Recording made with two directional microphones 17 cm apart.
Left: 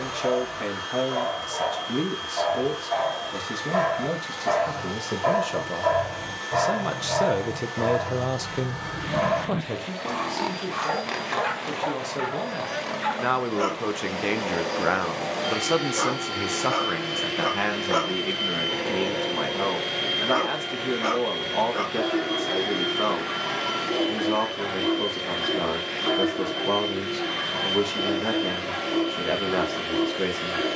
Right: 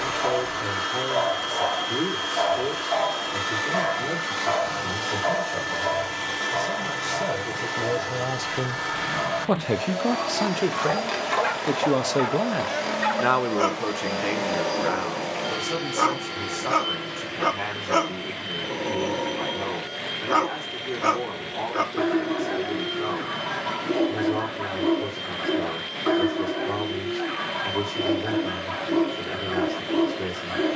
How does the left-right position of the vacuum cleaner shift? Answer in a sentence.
You can hear the vacuum cleaner travel towards the left.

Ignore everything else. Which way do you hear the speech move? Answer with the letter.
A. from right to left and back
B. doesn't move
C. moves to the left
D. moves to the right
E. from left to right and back
E.